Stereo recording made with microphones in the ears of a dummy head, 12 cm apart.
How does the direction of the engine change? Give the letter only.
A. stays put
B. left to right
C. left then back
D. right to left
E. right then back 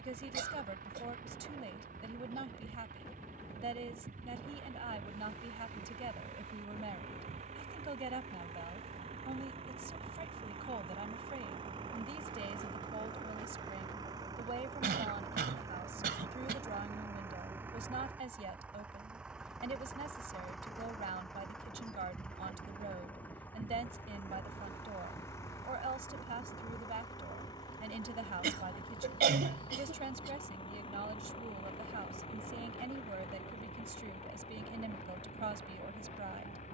D.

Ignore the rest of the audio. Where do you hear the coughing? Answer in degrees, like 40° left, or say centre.
70° right.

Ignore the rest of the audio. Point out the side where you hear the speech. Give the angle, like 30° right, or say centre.
50° right.